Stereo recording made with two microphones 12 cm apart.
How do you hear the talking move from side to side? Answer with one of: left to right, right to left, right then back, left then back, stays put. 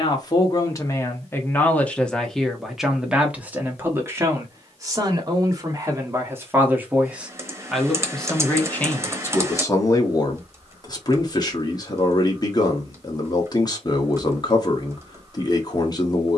right then back.